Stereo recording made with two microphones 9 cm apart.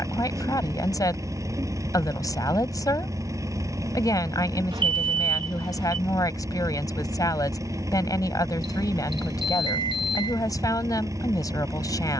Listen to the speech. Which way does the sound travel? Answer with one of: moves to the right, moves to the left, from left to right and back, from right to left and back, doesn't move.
doesn't move.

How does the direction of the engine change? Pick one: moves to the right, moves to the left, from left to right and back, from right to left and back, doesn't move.
doesn't move.